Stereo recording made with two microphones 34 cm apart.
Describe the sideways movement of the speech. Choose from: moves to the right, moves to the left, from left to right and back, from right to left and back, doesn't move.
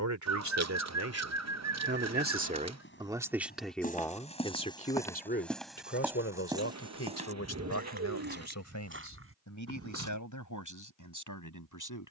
moves to the left.